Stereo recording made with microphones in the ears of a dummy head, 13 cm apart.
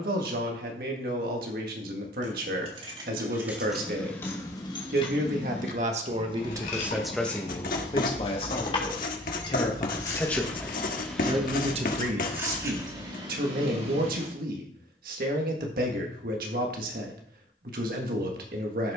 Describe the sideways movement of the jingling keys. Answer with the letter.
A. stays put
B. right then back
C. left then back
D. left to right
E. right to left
C.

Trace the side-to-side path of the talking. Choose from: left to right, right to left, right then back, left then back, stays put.
left then back.